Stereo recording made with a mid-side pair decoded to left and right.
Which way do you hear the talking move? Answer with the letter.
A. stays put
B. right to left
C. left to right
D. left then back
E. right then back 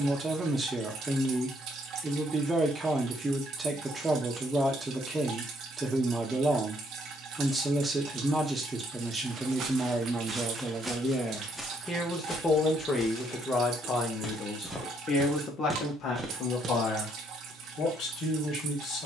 B.